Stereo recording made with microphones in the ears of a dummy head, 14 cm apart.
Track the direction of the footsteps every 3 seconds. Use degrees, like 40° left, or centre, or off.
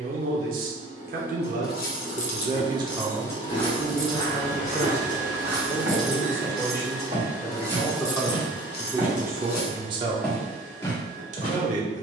off, 10° left, 30° right, 10° left.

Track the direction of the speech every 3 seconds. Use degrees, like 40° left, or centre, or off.
50° right, 10° left, 20° left, 30° right.